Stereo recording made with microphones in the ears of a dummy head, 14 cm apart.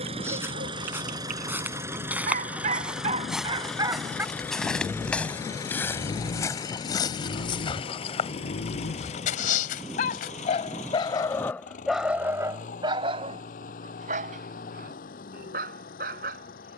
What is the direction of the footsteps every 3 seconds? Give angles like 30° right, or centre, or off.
10° right, centre, 30° left, 60° left, off, off.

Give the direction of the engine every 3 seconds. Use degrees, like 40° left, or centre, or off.
20° right, 10° left, 30° left, 40° left, 50° left, 60° left.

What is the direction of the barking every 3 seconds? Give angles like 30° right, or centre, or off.
50° right, 10° right, 60° left, 30° left, 40° right, 60° right.